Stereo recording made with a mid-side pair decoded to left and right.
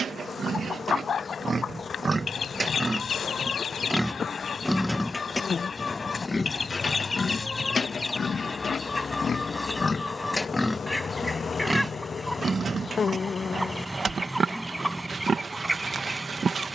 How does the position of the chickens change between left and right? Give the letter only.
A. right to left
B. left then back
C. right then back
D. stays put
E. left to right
E.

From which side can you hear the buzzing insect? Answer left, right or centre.
left.